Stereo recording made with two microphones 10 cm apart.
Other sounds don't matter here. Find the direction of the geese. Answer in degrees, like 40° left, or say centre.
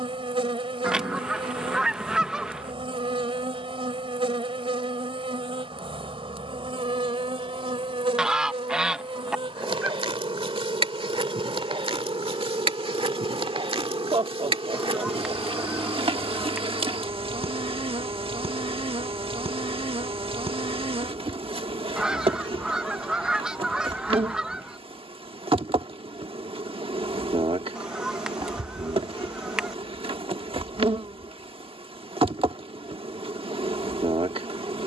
10° right.